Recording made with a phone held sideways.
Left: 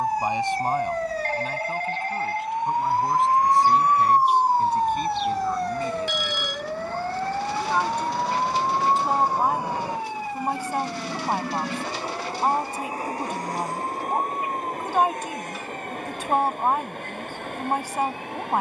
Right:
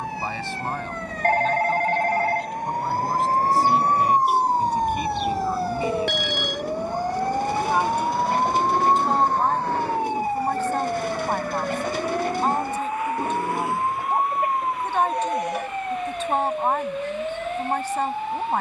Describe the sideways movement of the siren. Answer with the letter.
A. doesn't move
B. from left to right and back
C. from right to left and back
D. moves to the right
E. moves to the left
D.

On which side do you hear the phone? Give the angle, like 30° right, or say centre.
60° right.